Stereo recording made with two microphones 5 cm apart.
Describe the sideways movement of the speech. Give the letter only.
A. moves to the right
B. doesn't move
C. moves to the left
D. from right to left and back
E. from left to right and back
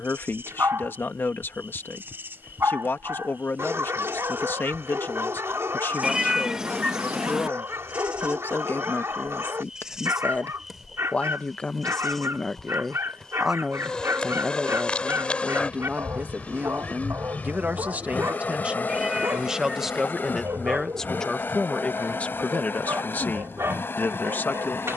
E.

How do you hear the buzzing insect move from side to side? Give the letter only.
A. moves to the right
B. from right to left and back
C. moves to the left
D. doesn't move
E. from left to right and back
C.